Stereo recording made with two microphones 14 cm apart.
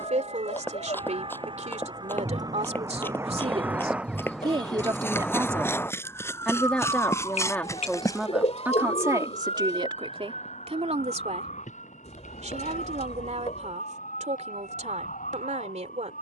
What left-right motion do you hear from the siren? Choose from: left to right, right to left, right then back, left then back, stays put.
right to left.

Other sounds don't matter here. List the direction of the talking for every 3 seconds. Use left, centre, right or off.
right, right, centre, right, right, right.